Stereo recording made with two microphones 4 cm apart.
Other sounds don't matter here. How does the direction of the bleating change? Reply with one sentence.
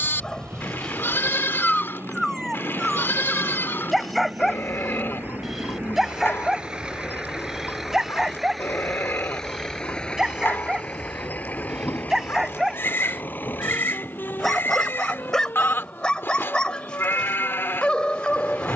You can hear the bleating stay in one place.